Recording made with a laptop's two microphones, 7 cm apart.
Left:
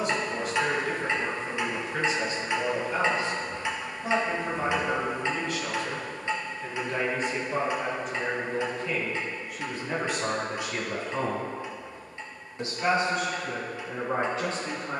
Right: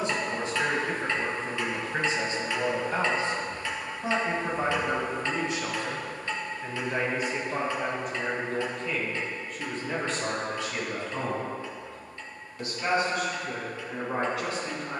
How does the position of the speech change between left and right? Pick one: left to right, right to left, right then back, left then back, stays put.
right to left.